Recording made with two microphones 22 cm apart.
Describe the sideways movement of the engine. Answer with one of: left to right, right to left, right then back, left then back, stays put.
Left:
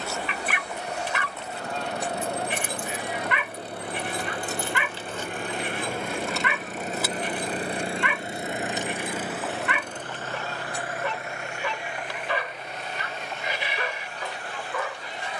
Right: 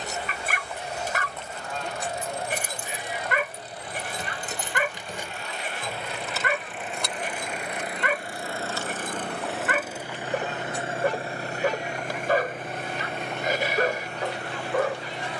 left to right.